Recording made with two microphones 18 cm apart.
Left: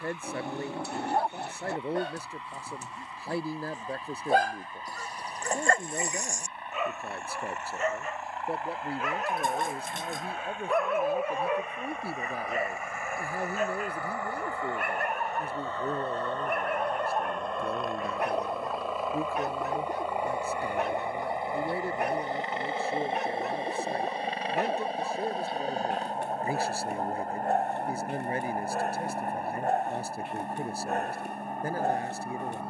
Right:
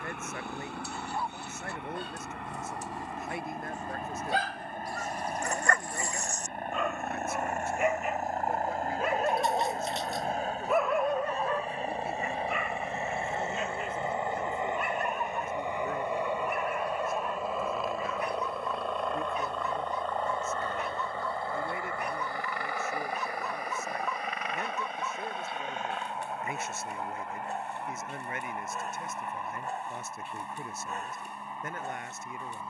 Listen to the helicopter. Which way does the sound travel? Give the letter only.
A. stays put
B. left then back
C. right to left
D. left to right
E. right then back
C.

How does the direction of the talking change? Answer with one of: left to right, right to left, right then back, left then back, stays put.
stays put.